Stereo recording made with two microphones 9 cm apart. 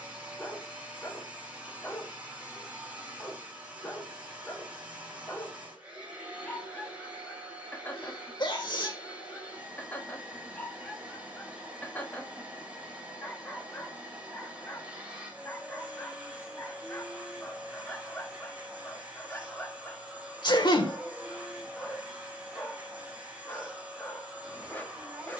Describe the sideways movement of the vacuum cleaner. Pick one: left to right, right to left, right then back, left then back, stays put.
stays put.